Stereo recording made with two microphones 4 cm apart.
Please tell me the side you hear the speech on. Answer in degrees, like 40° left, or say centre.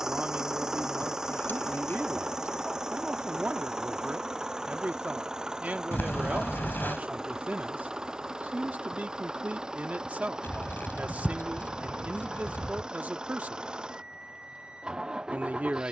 40° right.